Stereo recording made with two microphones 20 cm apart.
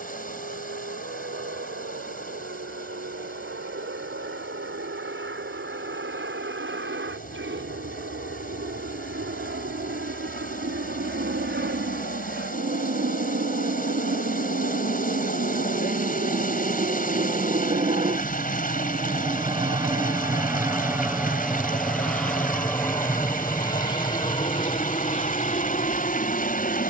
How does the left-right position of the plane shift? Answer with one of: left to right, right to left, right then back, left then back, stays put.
right to left.